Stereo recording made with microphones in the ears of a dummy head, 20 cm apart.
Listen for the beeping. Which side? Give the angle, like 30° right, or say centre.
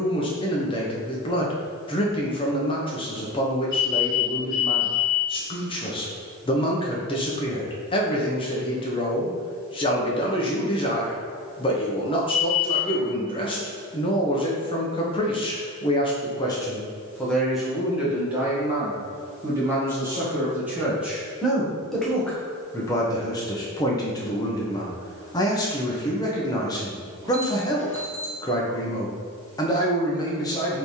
10° right.